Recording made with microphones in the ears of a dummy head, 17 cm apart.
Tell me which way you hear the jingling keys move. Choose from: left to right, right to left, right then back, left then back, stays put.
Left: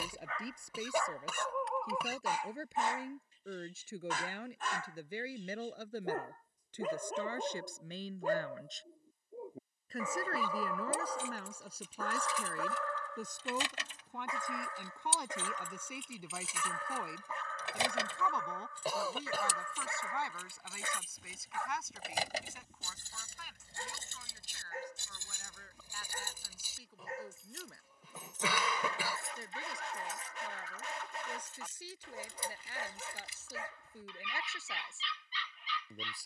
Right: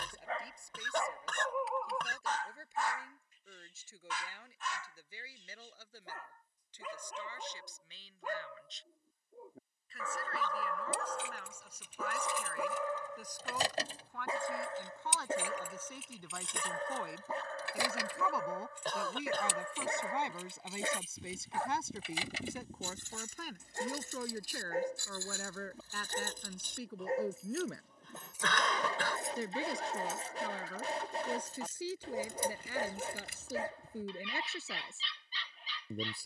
left then back.